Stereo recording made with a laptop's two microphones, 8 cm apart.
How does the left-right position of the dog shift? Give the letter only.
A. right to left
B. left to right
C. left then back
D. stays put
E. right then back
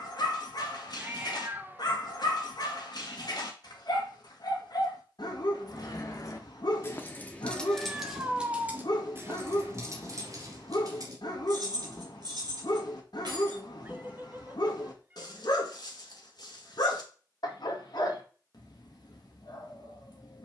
D.